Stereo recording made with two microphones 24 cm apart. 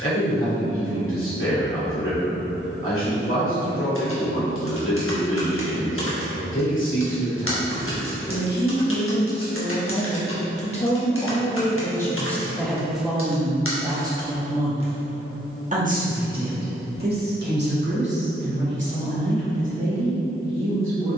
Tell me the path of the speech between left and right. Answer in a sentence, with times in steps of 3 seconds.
In this clip you hear the speech on the left from 0 s, in the centre from 12 s and on the right from 15 s.